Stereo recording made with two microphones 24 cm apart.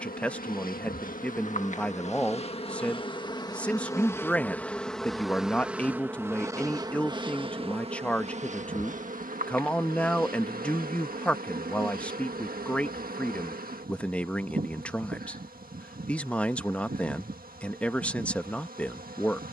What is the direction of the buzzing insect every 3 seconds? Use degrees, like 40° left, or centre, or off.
30° left, 10° left, 20° right, 40° right, 40° right, 40° right, 40° right.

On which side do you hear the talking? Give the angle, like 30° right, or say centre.
10° left.